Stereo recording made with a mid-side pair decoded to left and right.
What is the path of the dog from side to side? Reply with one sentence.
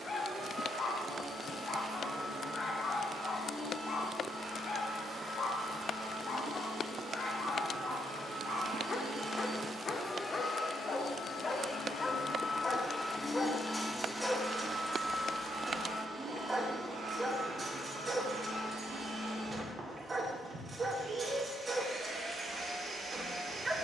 In this clip you hear the dog go from the left side to the right.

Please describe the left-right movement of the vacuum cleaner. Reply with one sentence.
In this clip you hear the vacuum cleaner go left and come back.